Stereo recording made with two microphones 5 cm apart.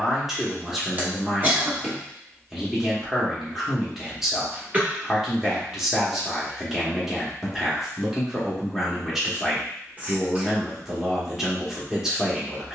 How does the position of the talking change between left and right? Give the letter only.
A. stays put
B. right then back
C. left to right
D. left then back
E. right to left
A.